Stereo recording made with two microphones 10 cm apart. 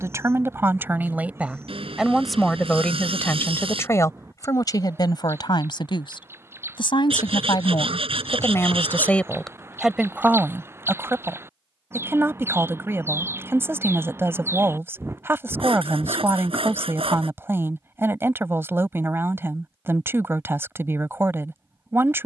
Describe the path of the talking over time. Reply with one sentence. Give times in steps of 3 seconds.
You can hear the talking in the centre from 0 s, on the left from 3 s, in the centre from 9 s and on the right from 12 s.